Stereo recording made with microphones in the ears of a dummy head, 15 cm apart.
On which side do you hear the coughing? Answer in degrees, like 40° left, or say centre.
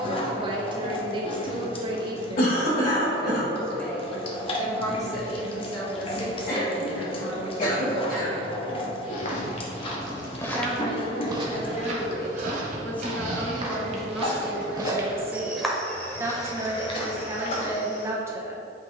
50° left.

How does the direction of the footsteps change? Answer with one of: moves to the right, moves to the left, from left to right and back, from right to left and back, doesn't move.
from left to right and back.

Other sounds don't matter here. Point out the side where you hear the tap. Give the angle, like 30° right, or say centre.
30° left.